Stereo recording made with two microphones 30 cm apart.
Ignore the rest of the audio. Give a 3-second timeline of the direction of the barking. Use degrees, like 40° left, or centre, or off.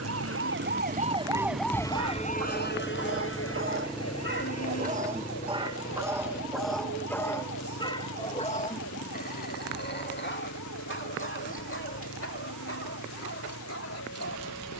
60° right, 30° right, 10° left, 40° left, 50° left.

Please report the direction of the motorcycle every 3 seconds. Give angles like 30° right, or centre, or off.
30° right, 10° left, 40° left, 50° left, 60° left.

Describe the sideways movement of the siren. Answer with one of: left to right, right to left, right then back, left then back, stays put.
right to left.